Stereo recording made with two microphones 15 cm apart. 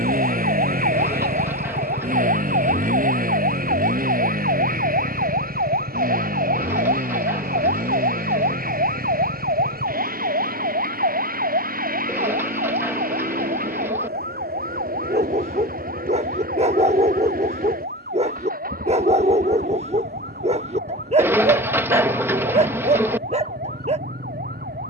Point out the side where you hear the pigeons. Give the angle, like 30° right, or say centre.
10° right.